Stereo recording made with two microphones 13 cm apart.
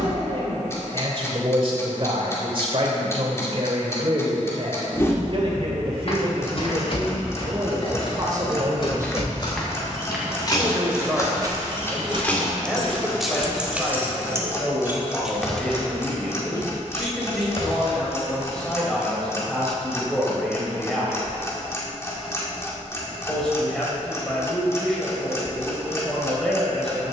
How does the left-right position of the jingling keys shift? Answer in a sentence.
You can hear the jingling keys go right and come back.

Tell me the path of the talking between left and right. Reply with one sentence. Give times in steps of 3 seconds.
You can hear the talking on the right from 0 s and in the centre from 9 s.